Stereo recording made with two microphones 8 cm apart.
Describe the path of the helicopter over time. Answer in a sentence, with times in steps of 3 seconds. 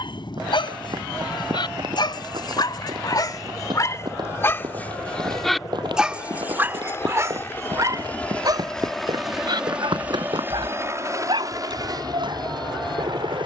You can hear the helicopter on the left from 0 s and on the right from 9 s.